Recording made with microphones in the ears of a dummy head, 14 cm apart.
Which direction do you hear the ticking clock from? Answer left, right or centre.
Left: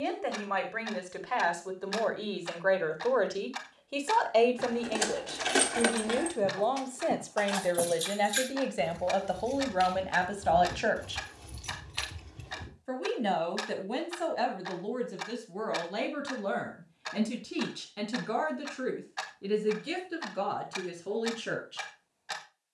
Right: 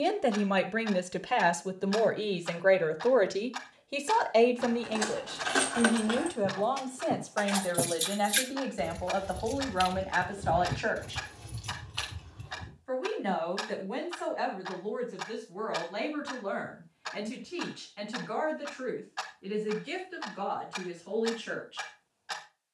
centre.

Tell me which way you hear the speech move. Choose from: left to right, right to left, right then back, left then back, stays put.
right to left.